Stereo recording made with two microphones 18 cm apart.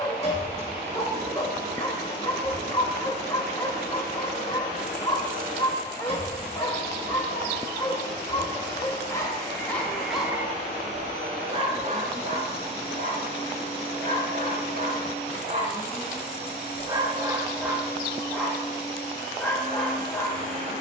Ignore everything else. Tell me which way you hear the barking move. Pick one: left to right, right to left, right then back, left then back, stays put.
right then back.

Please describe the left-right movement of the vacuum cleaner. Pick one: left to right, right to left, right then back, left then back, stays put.
stays put.